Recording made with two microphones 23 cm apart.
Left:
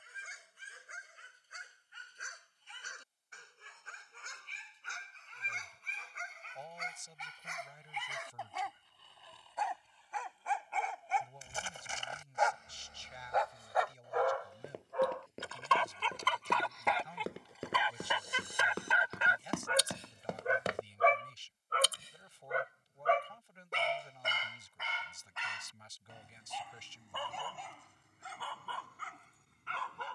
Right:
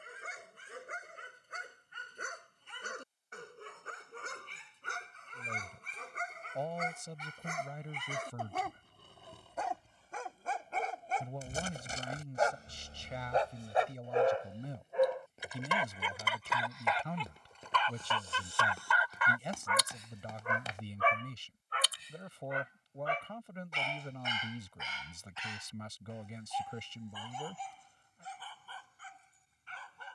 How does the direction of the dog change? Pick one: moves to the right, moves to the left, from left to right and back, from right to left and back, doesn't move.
moves to the left.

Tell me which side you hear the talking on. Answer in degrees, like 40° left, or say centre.
70° right.